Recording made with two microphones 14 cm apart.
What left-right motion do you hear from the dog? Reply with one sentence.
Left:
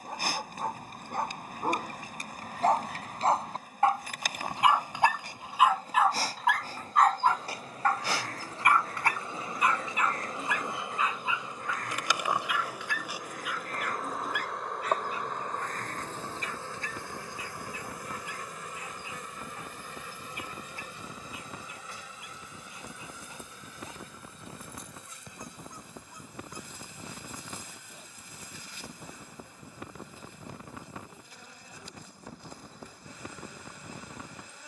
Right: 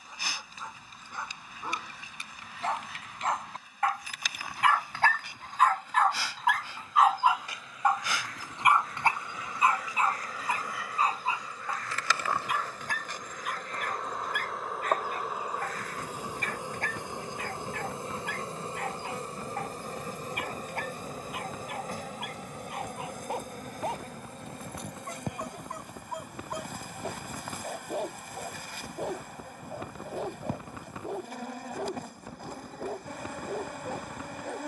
You can hear the dog go from the left side to the right.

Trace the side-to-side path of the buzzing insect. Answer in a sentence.
You can hear the buzzing insect travel towards the right.